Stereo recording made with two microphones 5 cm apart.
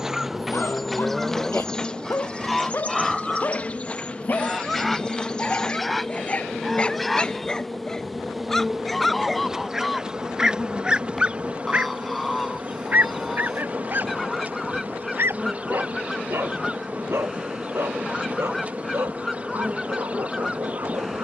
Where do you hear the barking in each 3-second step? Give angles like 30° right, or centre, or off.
50° left, 40° left, 20° left, 10° right, 40° right, 60° right, 70° right.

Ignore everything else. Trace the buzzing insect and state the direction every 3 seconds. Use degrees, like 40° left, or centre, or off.
10° left, 20° left, centre, 20° right, 30° right, 30° right, 30° right.